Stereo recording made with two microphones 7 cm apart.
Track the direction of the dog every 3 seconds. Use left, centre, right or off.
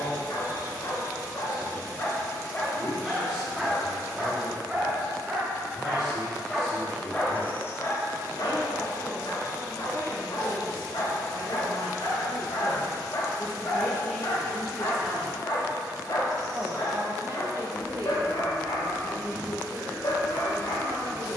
left, centre, left, left, left, left, left.